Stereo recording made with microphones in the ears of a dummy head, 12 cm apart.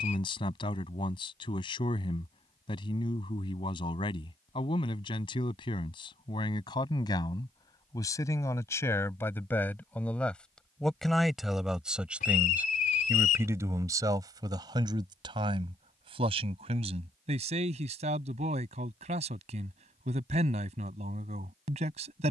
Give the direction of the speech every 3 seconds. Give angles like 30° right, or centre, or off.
40° left, 40° left, 30° left, 10° left, 20° right, 40° right, 50° right, 50° right.